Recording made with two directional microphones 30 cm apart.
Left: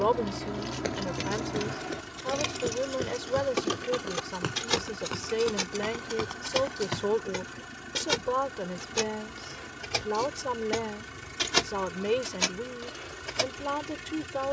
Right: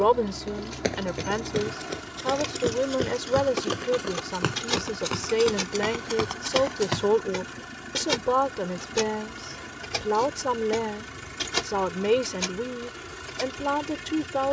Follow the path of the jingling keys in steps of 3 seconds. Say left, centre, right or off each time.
left, centre, centre, centre, left.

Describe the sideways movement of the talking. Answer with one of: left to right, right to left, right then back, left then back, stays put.
stays put.